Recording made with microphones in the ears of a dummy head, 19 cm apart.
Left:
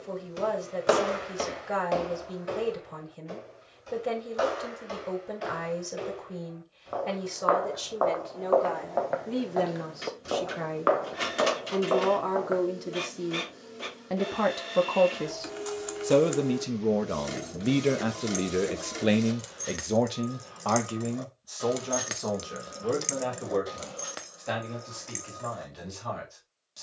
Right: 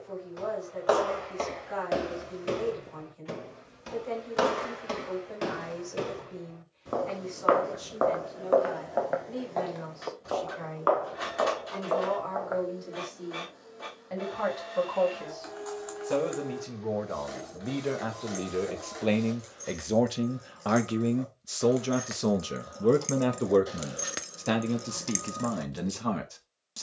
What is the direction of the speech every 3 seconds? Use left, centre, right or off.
left, left, left, left, left, left, centre, right, right.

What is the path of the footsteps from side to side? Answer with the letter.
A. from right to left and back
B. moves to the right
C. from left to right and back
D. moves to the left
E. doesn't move
C.